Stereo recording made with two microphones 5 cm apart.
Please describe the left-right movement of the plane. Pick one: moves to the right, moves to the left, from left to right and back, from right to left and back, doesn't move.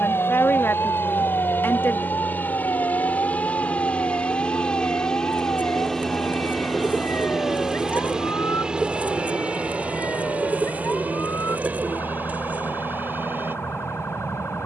moves to the right.